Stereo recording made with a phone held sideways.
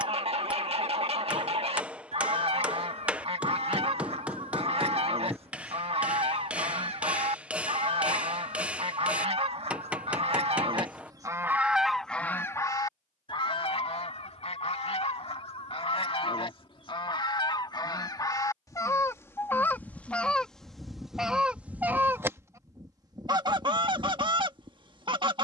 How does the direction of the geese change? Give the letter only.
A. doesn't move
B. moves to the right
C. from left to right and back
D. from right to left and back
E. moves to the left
D.